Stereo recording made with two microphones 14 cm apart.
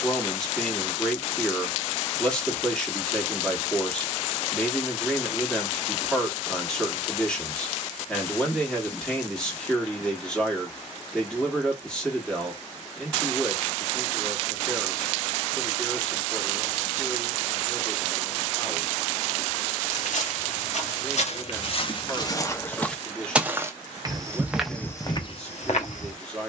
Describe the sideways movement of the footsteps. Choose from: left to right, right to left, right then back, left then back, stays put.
right then back.